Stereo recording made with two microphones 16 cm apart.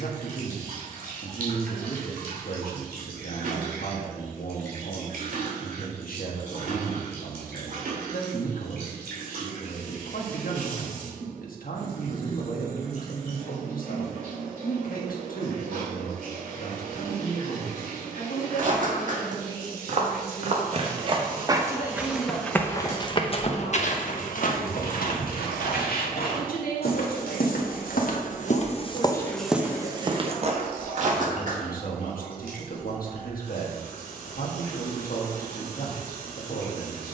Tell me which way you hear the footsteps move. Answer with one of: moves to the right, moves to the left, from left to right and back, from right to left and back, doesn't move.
from right to left and back.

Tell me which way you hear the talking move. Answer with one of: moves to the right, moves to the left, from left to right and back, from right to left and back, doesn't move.
doesn't move.